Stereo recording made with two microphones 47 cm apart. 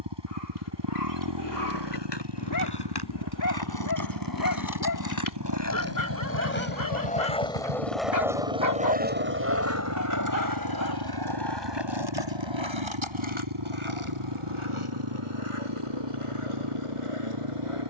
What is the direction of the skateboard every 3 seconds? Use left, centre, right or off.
left, left, centre, right, right, right.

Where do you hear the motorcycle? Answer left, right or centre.
right.